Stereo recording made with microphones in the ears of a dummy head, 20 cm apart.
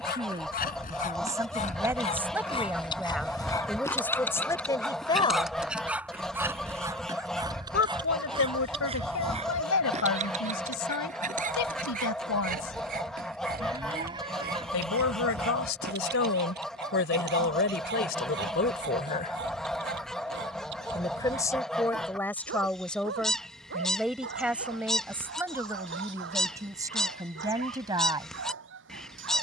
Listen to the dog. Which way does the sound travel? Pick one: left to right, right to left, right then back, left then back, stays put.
left to right.